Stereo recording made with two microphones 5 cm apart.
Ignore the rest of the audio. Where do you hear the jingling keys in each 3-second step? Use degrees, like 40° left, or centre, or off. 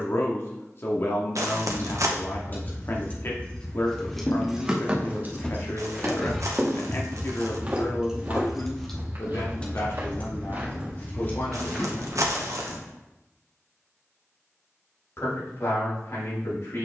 40° left, 10° right, 30° right, 30° left, off, off.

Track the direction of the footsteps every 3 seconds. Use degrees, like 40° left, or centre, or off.
off, 30° left, 10° right, 30° right, 20° left, off.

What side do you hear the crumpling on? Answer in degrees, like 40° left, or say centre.
70° right.